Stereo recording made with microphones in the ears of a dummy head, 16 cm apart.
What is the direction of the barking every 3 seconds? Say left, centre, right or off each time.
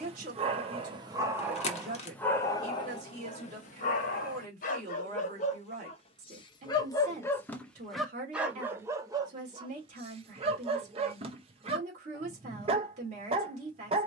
centre, left, centre, right, right.